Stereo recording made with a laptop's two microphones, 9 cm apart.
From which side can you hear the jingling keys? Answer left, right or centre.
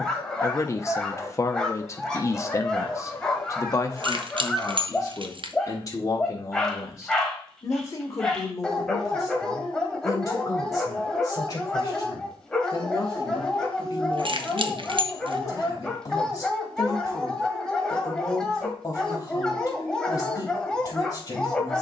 right.